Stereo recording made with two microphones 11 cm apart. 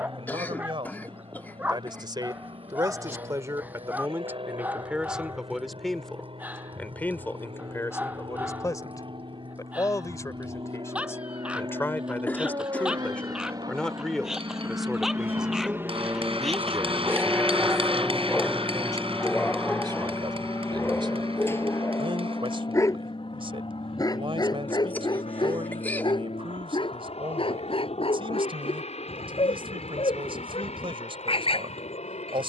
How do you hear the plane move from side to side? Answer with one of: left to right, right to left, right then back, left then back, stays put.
right to left.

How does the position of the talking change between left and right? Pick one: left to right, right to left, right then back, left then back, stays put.
left then back.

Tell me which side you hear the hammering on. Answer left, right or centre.
right.